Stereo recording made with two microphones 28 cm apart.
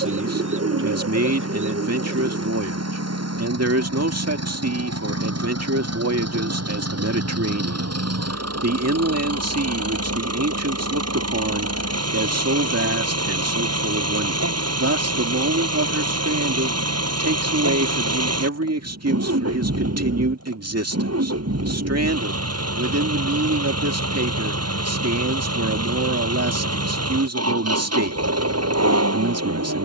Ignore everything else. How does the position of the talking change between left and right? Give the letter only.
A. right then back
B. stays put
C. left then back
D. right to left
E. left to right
B.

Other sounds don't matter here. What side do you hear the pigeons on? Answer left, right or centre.
right.